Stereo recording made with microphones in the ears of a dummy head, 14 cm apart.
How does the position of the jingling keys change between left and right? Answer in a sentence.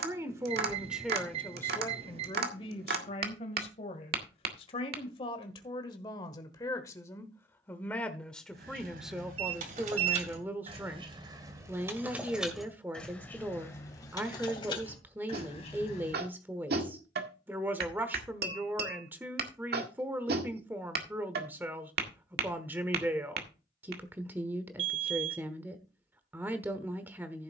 You can hear the jingling keys move to the left.